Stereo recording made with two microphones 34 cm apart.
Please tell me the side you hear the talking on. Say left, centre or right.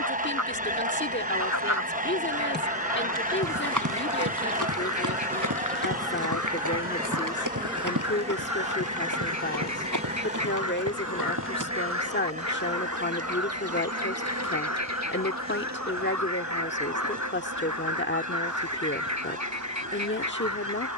left.